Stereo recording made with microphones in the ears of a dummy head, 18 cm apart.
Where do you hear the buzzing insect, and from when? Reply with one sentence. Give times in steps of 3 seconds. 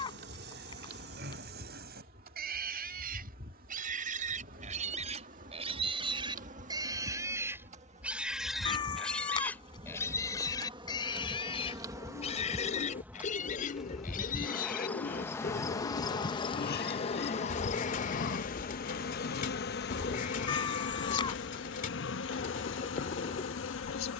In this clip you hear the buzzing insect on the right from 0 s, in the centre from 12 s and on the left from 15 s.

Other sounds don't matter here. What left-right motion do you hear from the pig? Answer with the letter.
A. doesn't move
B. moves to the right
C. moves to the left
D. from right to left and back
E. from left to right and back
C.